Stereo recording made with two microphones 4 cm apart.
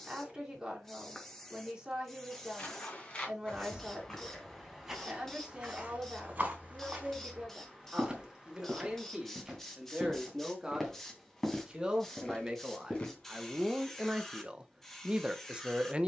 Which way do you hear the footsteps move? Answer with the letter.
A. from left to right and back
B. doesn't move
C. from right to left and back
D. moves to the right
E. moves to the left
A.